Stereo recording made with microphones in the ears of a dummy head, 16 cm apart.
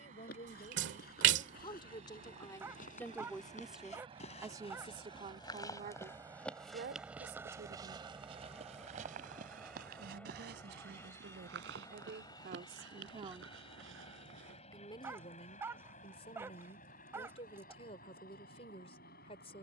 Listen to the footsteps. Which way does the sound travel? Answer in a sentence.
You can hear the footsteps go from the left side to the right.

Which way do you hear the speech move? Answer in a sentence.
You can hear the speech go right and come back.